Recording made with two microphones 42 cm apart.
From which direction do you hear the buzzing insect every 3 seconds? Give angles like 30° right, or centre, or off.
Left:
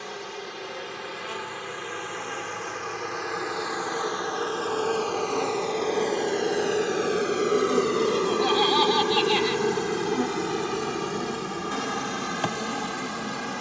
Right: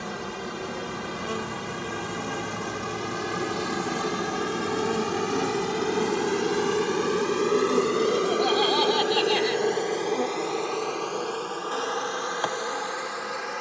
60° right, 40° right, 10° right, 30° left, 50° left.